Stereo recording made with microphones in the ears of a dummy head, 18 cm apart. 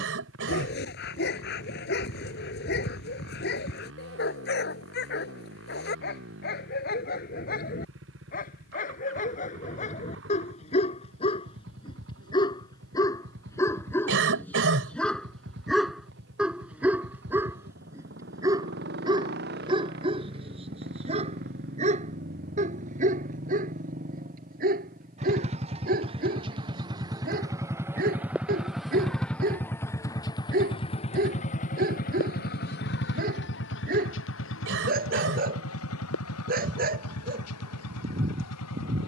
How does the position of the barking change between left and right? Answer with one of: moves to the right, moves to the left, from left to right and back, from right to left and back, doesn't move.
moves to the right.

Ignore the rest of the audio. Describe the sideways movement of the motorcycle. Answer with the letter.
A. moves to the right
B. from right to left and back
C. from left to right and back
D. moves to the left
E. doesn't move
D.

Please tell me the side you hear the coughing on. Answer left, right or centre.
right.